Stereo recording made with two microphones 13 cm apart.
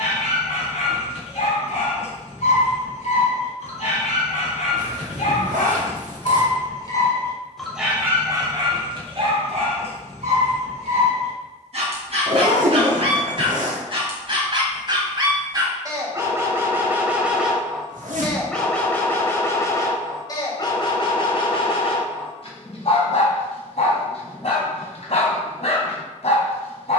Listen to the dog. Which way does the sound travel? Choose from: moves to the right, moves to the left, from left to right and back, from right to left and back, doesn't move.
from left to right and back.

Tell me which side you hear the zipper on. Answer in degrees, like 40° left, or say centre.
90° right.